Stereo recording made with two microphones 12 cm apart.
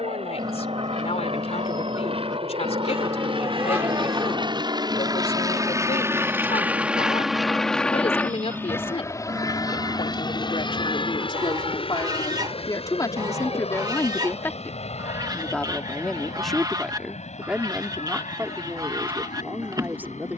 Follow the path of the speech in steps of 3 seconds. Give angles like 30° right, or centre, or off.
70° left, 70° left, 60° left, 50° left, 30° left, centre, 20° right.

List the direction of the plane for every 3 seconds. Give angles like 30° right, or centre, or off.
70° right, 40° right, centre, 40° left, 60° left, 60° left, 70° left.